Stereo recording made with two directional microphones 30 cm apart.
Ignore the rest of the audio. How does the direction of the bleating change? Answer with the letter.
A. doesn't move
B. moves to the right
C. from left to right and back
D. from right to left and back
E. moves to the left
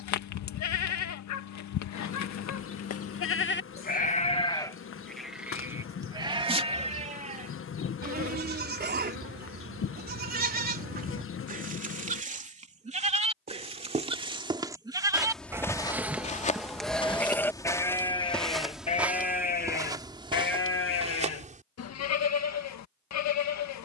C.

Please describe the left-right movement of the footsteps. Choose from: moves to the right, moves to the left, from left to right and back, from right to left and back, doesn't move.
from right to left and back.